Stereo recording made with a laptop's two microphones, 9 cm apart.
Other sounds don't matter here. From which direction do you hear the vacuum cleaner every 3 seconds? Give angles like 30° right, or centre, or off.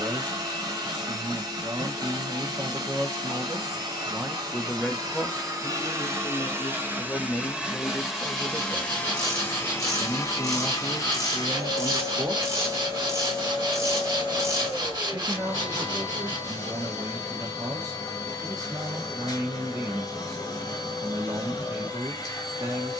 50° right, 40° right, 10° right, 30° left, 40° left, 40° left, 40° left, 40° left.